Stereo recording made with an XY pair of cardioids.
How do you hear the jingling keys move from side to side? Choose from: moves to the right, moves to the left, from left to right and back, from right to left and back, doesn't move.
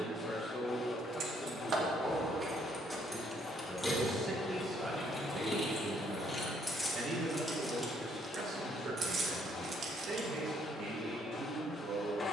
from right to left and back.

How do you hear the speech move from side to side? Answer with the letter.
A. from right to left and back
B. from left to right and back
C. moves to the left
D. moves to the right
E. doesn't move
D.